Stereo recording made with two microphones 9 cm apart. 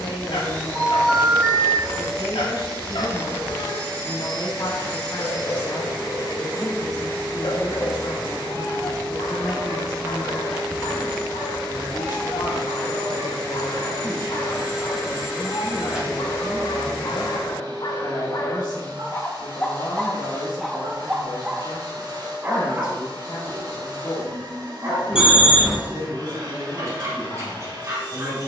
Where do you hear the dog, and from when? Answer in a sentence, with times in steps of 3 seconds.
You can hear the dog on the left from 0 s and on the right from 21 s.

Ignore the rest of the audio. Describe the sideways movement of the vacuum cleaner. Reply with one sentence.
You can hear the vacuum cleaner stay in one place.